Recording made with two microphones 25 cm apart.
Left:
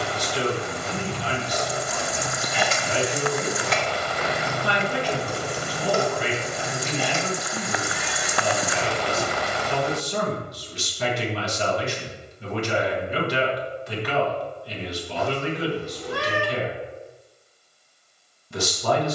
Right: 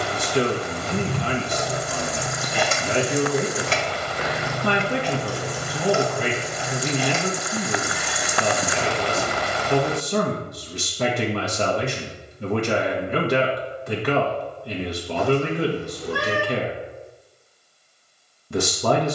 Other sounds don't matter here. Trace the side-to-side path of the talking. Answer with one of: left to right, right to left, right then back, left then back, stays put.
stays put.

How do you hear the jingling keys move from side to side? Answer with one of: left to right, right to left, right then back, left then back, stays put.
right to left.